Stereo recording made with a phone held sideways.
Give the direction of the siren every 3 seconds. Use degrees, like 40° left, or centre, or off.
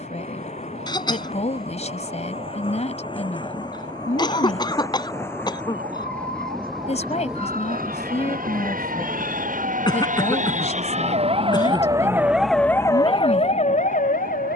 80° right, 80° right, 70° right, 50° right, 30° left.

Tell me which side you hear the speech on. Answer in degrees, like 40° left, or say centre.
40° left.